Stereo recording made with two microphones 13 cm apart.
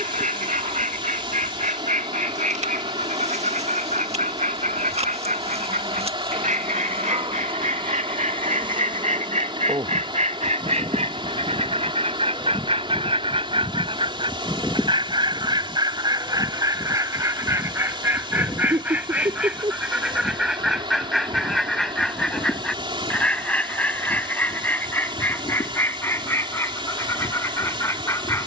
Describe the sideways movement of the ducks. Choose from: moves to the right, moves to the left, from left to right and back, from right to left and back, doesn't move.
moves to the left.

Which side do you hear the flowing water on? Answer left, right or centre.
right.